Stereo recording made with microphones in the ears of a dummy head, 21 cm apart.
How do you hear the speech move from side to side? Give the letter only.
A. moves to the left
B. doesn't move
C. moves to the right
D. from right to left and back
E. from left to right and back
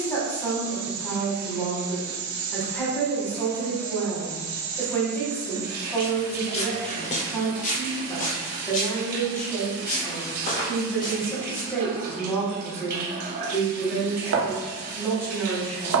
B.